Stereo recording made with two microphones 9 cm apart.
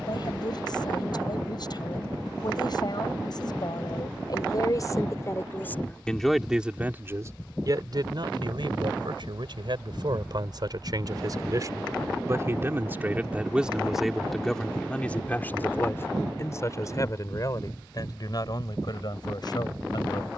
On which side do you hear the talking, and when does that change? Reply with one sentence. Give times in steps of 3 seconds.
You can hear the talking on the left from 0 s, on the right from 6 s, in the centre from 12 s and on the left from 15 s.